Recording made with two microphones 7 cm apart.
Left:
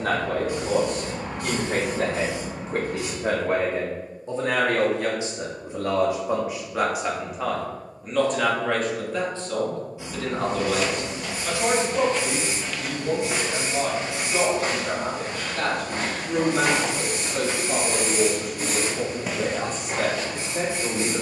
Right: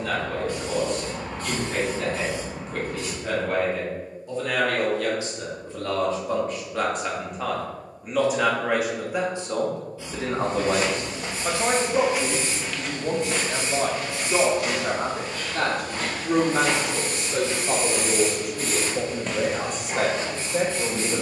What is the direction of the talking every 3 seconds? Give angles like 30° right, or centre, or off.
40° left, 30° left, centre, 30° right, 50° right, 60° right, 70° right.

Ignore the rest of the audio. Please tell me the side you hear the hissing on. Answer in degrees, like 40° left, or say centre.
20° left.